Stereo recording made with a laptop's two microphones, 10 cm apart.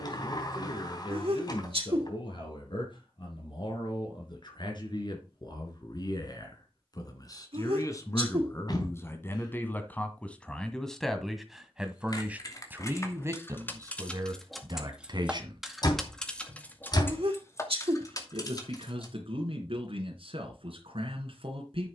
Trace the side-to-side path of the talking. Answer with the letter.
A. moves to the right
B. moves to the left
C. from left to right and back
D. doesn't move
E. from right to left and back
A.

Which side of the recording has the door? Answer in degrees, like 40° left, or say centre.
40° left.